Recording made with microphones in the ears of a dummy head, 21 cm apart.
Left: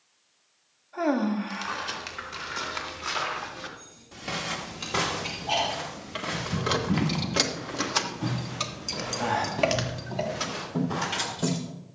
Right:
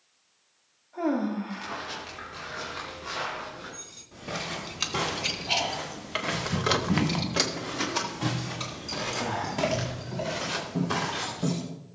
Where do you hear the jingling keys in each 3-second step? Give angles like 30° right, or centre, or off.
off, 60° right, 10° left, 50° left.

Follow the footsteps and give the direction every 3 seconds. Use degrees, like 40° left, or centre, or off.
60° left, 30° left, 30° right, 60° right.